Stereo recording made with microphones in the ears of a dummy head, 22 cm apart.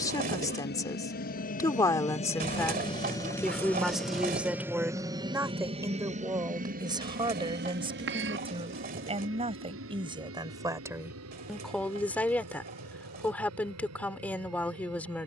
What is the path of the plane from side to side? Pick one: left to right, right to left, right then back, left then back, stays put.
left to right.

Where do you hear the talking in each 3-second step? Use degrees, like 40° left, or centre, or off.
10° left, 10° right, 20° right, 20° right, 10° left.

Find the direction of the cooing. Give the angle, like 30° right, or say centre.
40° right.